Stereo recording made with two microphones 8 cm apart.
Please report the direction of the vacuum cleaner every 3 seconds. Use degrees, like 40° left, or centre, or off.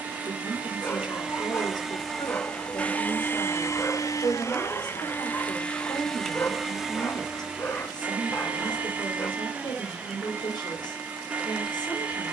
10° right, 30° left, 10° right, 20° right.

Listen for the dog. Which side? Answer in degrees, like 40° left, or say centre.
30° left.